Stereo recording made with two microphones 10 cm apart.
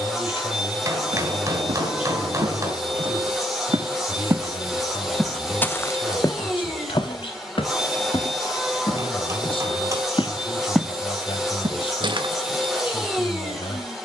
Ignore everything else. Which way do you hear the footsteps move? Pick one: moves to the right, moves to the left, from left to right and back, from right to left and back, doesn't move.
from right to left and back.